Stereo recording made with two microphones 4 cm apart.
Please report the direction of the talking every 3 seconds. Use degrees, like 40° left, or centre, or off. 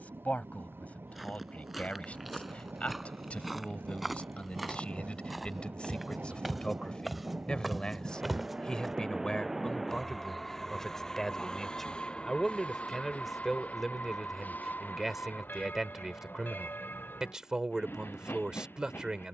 40° left, 30° left, 20° left, 10° left, centre, 10° right, 20° right.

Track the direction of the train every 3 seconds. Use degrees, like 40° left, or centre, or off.
70° right, 60° right, 30° right, 10° left, 40° left, 50° left, 60° left.